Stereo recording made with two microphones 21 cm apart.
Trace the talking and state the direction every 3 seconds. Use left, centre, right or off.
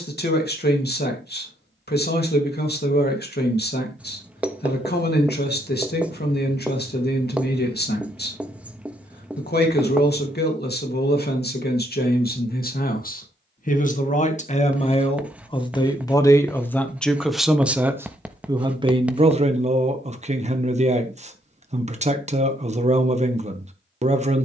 left, left, left, left, left, centre, right, right.